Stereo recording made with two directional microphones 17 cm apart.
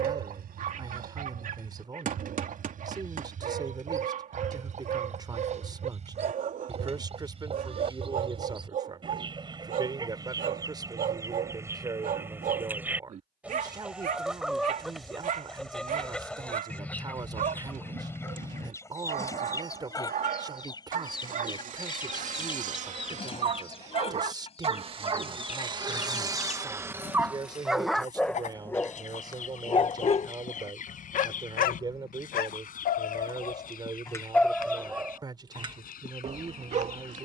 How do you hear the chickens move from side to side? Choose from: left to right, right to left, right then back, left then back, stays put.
right to left.